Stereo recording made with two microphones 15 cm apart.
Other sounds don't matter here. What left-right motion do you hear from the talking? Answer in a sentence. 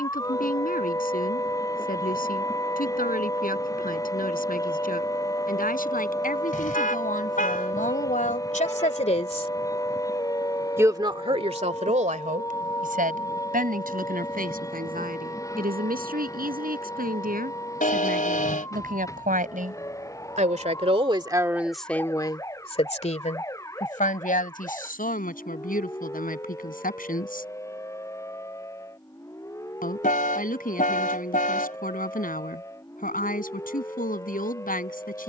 In this clip you hear the talking go right and come back.